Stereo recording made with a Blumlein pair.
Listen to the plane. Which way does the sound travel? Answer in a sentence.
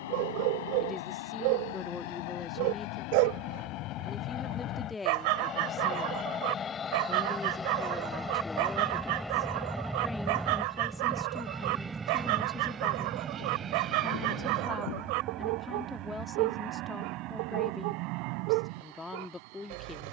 You can hear the plane travel towards the right.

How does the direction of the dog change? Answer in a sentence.
You can hear the dog stay put.